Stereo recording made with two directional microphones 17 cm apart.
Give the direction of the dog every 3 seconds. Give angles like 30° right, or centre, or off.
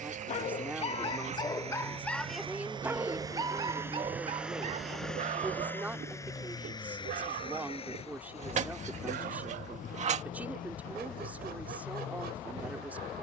20° left, 40° right, 60° right, 70° right, 70° right.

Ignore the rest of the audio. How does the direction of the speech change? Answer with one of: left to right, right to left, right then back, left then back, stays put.
stays put.